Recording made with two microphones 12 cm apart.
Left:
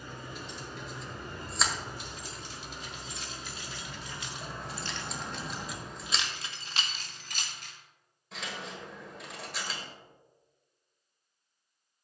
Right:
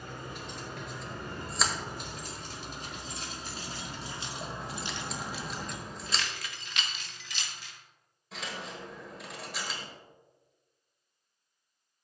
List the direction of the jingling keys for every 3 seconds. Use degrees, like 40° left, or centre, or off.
50° right, 20° right, 40° left, off.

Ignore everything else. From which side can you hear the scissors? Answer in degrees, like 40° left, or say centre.
centre.